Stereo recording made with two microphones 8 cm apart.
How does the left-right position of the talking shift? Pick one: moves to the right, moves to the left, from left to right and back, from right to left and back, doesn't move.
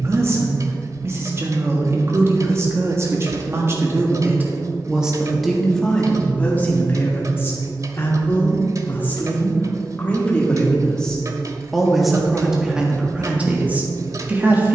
from right to left and back.